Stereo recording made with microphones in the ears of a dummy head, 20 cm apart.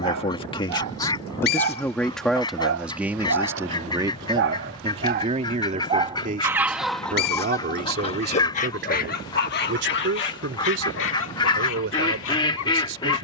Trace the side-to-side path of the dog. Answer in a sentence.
You can hear the dog travel towards the left.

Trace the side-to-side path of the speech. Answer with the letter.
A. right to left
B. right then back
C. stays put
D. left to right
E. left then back
D.